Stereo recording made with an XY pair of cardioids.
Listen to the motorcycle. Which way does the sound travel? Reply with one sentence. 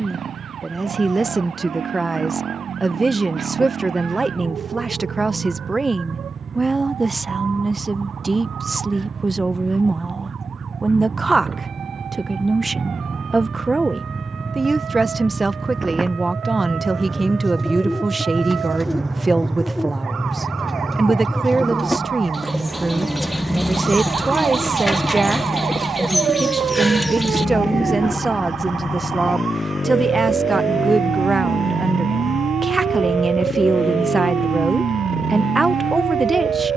In this clip you hear the motorcycle go from the right side to the left.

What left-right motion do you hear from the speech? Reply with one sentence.
In this clip you hear the speech stay in one place.